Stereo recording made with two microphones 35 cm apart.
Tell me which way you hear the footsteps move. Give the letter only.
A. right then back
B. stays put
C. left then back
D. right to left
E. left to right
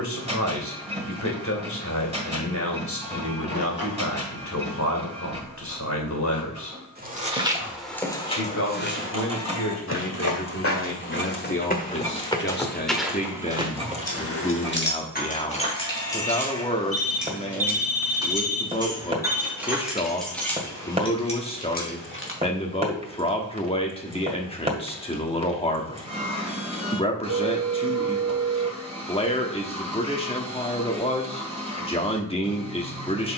C.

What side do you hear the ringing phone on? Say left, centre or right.
left.